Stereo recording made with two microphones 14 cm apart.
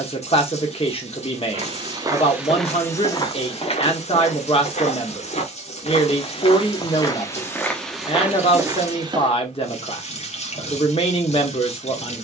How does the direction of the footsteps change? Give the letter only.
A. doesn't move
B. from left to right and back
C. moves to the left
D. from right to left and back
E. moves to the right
D.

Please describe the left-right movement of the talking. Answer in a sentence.
You can hear the talking stay in one place.